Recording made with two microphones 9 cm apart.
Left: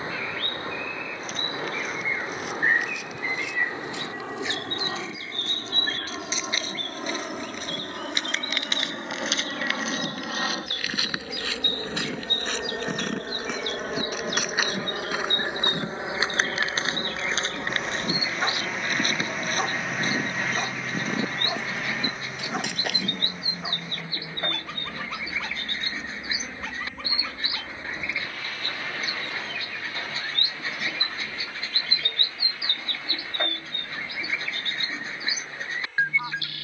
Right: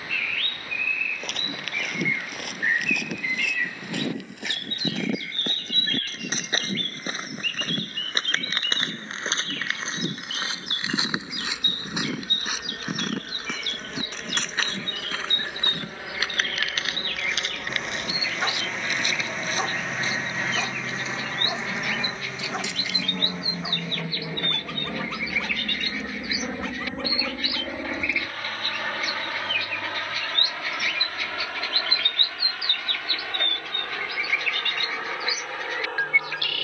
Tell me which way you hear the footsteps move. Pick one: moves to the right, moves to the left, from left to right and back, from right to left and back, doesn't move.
moves to the left.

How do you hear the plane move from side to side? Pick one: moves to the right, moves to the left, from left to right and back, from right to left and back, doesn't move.
moves to the right.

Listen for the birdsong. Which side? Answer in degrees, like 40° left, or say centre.
20° left.